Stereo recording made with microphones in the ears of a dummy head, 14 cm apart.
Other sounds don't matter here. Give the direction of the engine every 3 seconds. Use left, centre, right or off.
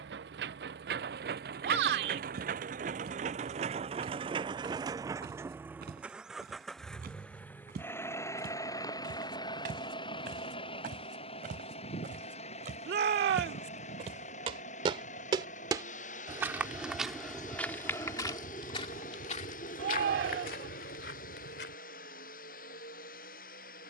right, right, centre, left, left, left, left, left.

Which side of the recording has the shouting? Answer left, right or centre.
right.